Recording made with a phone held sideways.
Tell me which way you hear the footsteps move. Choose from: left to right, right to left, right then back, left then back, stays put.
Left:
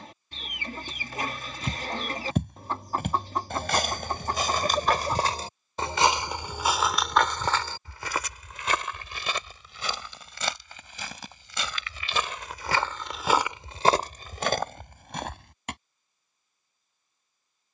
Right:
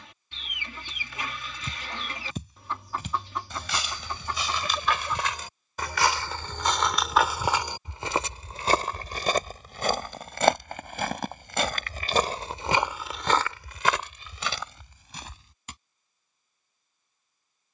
right then back.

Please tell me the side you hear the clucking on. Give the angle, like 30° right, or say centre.
40° left.